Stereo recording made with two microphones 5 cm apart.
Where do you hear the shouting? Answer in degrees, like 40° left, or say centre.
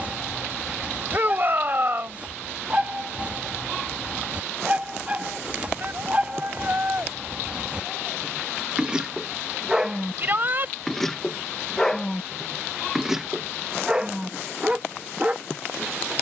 40° right.